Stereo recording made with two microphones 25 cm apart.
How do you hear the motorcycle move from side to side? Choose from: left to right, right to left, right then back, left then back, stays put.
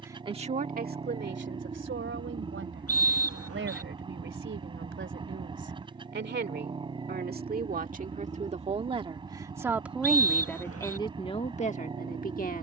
stays put.